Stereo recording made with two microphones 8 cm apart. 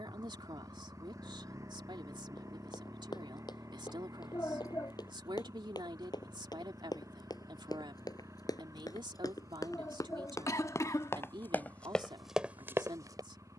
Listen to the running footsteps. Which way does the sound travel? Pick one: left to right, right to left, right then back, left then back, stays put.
left to right.